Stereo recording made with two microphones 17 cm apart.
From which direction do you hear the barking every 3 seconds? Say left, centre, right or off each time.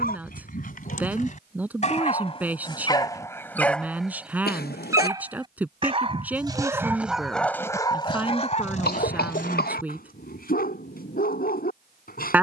left, centre, centre, left.